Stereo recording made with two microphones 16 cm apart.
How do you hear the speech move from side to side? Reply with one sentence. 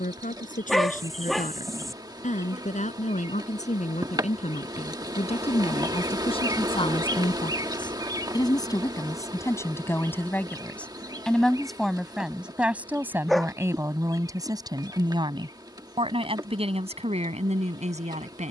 In this clip you hear the speech travel towards the right.